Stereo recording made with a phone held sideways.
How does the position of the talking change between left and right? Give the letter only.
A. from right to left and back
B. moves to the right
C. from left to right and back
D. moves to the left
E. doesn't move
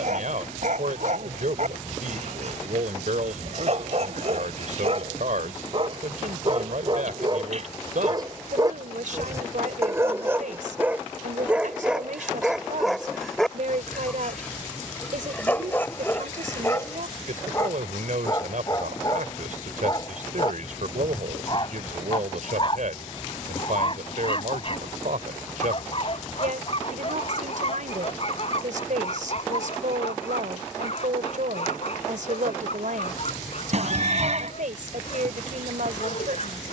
E.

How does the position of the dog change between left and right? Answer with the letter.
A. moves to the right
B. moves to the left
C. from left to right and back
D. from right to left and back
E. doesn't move
B.